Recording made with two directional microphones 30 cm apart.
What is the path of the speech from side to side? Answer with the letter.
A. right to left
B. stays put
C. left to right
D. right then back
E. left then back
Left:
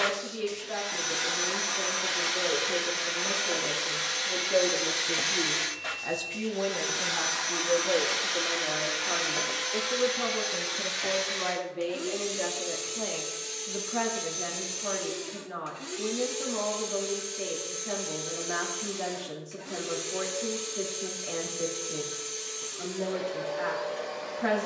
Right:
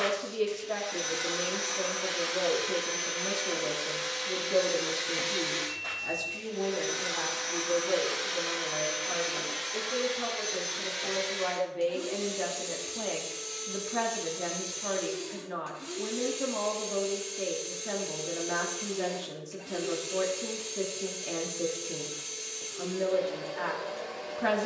E.